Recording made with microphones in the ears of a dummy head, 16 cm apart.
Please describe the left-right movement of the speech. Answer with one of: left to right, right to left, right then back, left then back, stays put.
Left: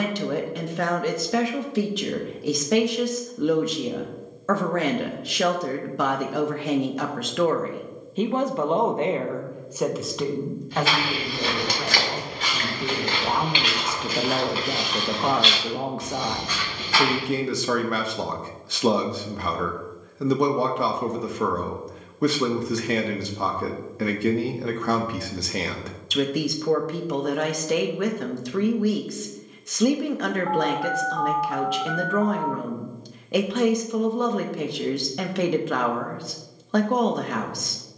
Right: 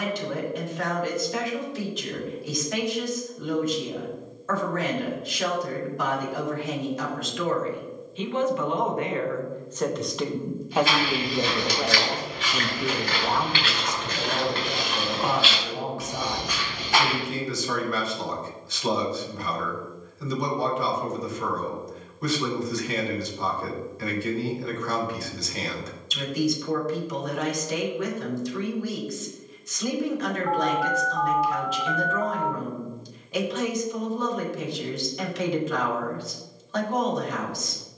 right then back.